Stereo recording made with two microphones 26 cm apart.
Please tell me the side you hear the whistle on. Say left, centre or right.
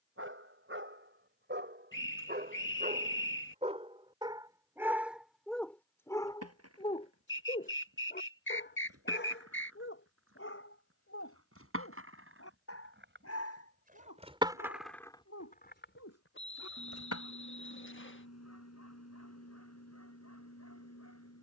left.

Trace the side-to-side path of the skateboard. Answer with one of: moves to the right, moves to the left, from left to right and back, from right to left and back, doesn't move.
moves to the left.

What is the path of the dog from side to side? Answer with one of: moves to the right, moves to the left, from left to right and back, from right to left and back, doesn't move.
moves to the left.